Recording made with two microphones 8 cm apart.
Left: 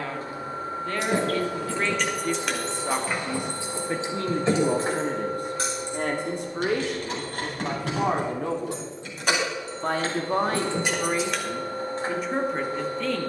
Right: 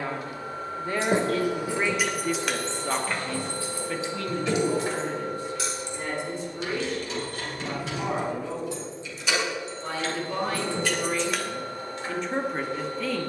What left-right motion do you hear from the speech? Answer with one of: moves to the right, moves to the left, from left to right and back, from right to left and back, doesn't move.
from right to left and back.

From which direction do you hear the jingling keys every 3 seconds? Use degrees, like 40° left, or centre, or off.
10° right, 30° left, 50° left, 30° left, off.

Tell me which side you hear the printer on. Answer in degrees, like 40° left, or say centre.
30° left.